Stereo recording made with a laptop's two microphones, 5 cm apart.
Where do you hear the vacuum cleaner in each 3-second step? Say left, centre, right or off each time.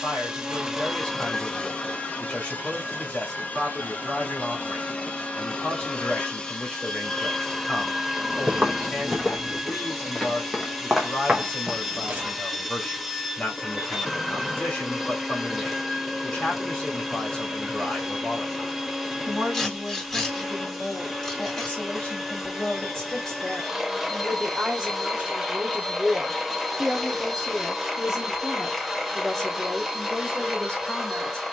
centre, left, centre, centre, centre, centre, centre, centre, centre, centre, centre.